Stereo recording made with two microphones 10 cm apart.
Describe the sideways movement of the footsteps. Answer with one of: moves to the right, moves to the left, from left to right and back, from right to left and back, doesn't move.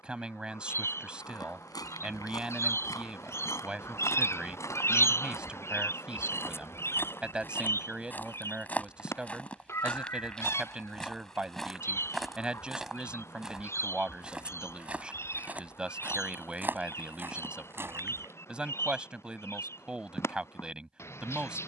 moves to the right.